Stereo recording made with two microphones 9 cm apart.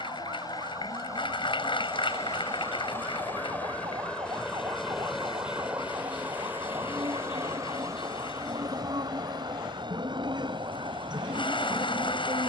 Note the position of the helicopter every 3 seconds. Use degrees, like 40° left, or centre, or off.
40° left, 10° left, 30° right, 50° right.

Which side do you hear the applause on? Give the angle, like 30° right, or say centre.
60° left.